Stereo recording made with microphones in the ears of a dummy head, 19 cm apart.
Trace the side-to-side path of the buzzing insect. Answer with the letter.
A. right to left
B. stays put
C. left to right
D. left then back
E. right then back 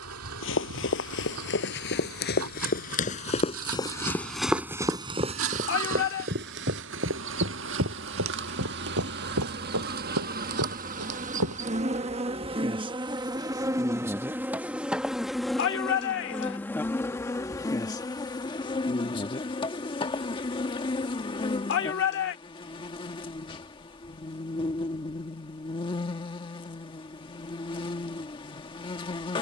A.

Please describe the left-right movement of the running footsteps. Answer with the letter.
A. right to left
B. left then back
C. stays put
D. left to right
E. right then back
D.